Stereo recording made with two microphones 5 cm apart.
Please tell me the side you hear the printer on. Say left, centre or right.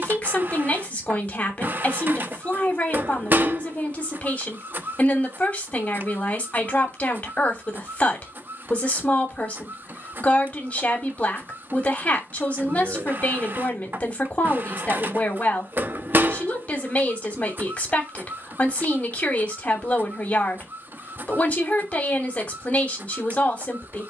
right.